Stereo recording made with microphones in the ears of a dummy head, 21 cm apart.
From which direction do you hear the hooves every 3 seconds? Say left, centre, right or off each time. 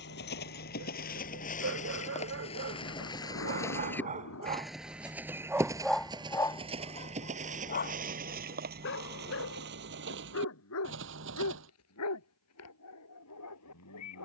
left, centre, right, right, off.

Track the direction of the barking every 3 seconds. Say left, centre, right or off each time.
right, right, left, left, left.